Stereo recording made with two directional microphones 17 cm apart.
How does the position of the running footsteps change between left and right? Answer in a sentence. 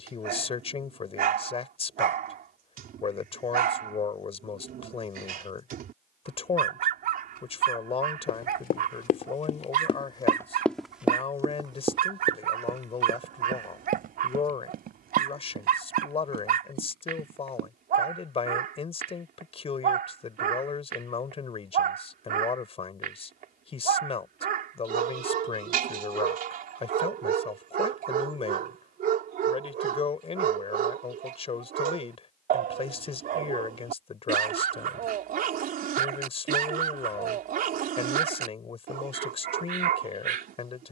You can hear the running footsteps move to the right.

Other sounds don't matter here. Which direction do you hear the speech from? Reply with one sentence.
In this clip you hear the speech on the left.